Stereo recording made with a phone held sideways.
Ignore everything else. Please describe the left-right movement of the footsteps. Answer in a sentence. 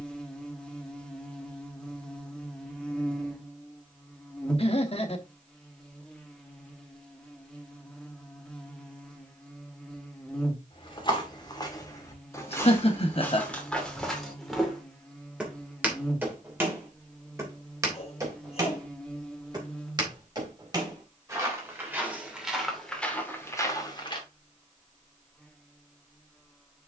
In this clip you hear the footsteps go right and come back.